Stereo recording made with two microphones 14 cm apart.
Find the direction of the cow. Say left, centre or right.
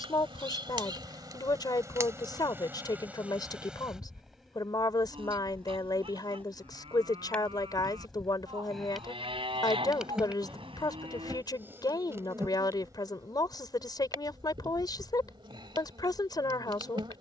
right.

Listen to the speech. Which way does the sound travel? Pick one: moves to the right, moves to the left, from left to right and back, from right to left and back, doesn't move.
doesn't move.